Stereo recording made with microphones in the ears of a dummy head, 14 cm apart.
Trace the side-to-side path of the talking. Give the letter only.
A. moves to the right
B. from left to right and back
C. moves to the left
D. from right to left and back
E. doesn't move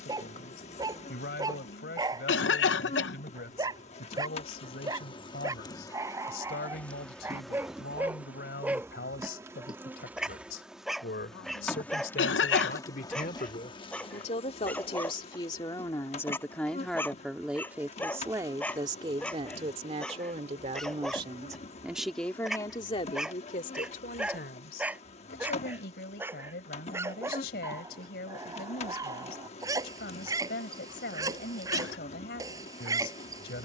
B.